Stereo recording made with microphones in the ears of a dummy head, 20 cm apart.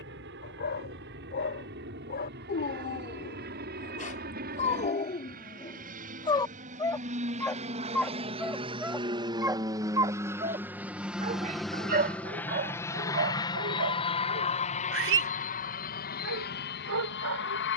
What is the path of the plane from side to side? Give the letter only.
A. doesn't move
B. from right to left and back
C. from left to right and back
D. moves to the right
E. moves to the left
E.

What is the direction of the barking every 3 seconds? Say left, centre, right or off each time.
left, left, centre, right, right, right.